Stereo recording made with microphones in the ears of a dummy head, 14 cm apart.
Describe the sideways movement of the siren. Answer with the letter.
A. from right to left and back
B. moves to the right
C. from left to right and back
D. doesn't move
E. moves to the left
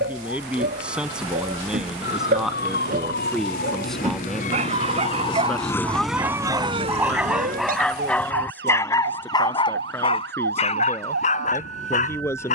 B.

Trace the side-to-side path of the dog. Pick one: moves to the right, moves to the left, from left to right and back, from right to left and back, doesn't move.
moves to the left.